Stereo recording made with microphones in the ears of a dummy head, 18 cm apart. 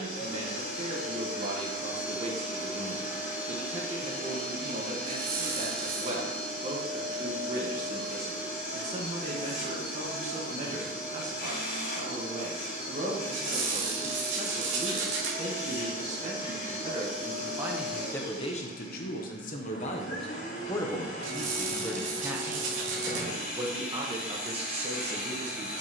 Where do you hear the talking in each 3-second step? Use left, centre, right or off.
right, right, right, right, right, right, left, centre, right.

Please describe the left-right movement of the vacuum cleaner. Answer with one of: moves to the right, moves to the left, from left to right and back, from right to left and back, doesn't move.
doesn't move.